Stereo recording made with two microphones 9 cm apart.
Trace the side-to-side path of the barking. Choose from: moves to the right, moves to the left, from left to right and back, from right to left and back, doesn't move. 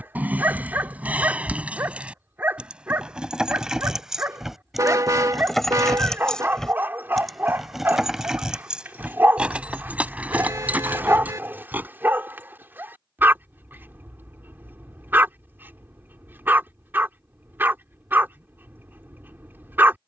doesn't move.